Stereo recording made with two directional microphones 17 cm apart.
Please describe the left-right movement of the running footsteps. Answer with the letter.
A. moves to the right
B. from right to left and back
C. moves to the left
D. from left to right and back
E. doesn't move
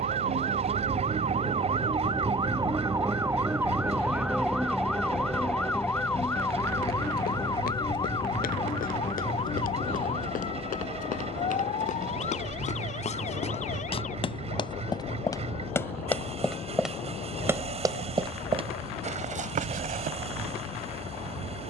A.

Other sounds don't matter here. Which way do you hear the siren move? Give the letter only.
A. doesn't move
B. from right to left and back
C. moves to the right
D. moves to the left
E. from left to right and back
D.